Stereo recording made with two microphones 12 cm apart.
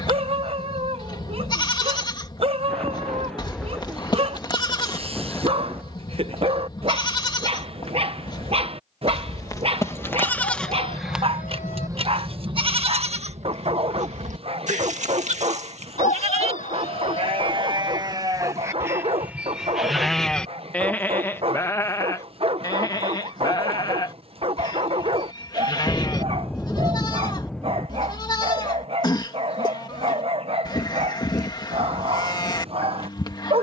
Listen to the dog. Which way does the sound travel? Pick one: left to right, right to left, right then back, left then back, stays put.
stays put.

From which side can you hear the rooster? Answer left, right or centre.
left.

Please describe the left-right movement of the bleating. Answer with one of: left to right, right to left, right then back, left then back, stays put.
right then back.